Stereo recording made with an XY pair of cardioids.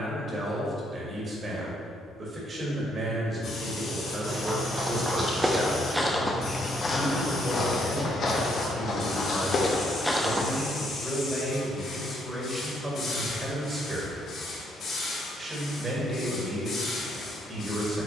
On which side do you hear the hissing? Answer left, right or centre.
left.